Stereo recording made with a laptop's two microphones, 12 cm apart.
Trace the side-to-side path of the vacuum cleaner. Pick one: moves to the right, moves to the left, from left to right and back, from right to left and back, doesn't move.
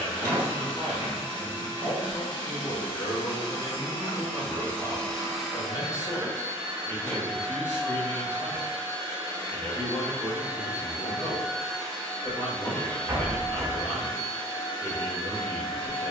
from left to right and back.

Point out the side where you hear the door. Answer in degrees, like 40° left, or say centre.
30° right.